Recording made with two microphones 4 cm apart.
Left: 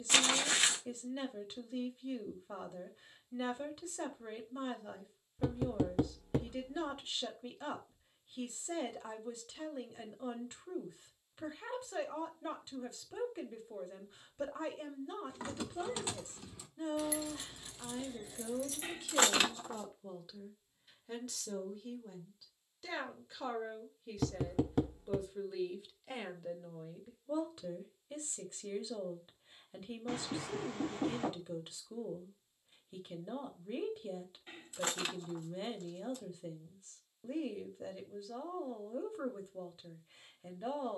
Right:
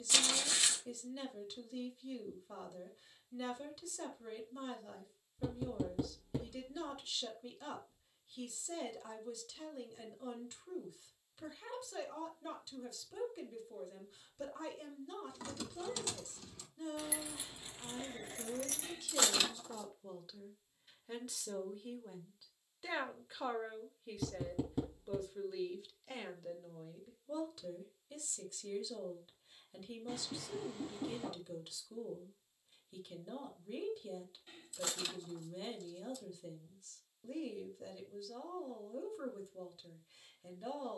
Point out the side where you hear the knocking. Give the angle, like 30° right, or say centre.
70° left.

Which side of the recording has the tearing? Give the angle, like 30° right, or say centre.
50° left.